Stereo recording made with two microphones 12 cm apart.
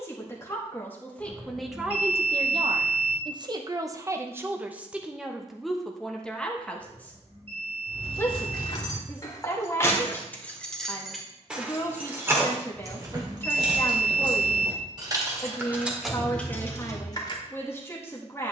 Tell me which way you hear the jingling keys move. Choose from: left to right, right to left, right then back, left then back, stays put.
right then back.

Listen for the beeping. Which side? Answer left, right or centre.
right.